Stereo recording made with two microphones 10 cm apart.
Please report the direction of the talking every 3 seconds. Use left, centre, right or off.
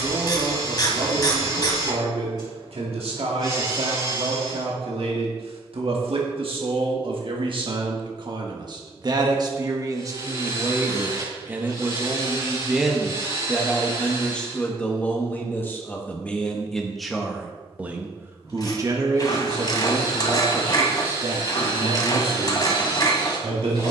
right, right, right, right, centre, centre, right, right.